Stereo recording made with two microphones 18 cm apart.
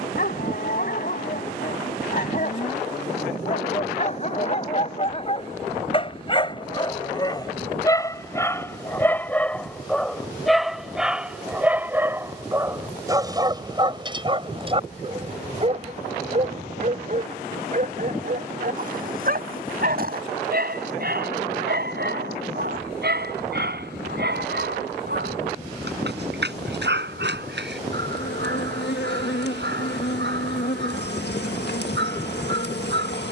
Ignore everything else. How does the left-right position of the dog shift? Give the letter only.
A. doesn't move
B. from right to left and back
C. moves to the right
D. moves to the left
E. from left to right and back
C.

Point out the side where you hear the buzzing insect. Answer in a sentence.
In this clip you hear the buzzing insect on the left.